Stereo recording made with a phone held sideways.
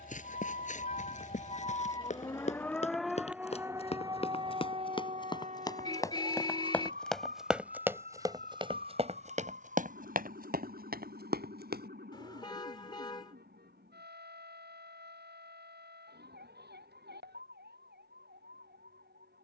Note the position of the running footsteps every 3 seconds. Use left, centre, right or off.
left, left, centre, right, off, off, off.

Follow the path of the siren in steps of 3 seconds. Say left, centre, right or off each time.
left, right, right, right, right, right, right.